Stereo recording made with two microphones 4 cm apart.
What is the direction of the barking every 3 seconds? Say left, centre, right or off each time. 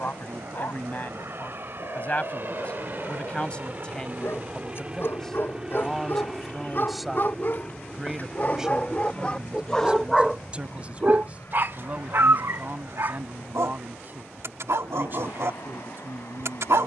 left, left, left, centre, right, right.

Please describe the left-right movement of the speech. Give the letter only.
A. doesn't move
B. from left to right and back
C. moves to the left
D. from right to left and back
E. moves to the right
E.